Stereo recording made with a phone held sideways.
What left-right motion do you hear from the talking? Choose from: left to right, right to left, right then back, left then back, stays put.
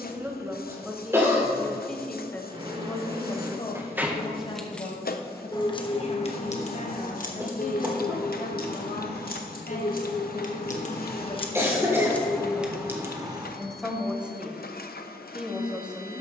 left then back.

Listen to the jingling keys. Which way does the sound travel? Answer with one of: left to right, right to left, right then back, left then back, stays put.
left then back.